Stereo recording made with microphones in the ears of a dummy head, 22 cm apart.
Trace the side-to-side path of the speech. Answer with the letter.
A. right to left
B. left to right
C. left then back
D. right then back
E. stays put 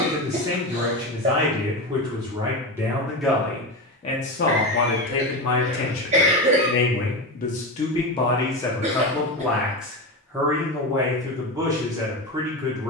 C.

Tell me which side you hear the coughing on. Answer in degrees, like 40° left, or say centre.
30° right.